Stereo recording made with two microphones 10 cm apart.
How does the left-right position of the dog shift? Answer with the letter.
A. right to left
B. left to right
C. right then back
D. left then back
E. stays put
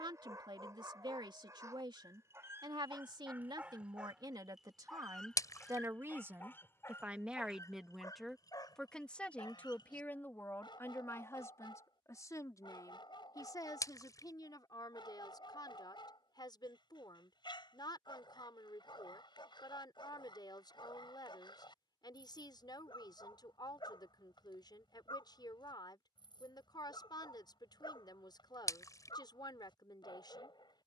A.